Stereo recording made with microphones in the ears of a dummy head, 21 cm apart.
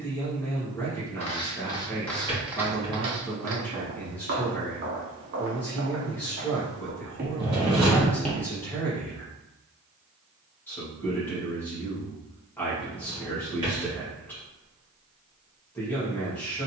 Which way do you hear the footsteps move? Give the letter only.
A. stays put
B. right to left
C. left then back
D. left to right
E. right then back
E.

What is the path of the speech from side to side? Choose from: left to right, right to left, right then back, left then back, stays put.
stays put.